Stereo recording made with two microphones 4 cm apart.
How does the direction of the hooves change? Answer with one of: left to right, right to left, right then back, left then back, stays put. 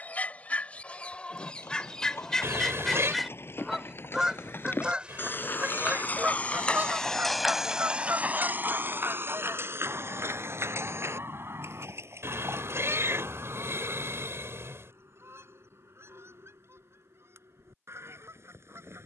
left to right.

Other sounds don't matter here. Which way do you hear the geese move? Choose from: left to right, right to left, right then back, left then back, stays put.
left to right.